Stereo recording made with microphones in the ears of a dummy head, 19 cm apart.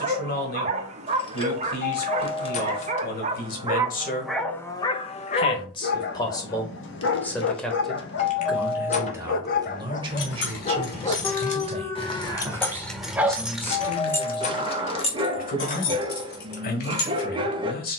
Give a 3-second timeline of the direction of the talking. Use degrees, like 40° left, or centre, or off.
50° left, 30° left, 10° left, 20° right, centre, 40° left.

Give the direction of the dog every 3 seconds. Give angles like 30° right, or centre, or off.
30° right, centre, 50° left, 30° left, 10° right, 20° right.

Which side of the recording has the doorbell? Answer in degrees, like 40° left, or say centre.
30° left.